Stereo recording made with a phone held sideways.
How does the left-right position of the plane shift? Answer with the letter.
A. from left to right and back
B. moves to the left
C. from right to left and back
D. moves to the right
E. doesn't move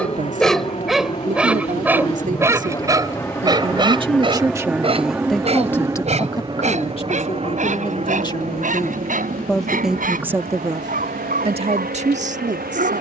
D.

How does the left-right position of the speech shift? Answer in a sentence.
In this clip you hear the speech go left and come back.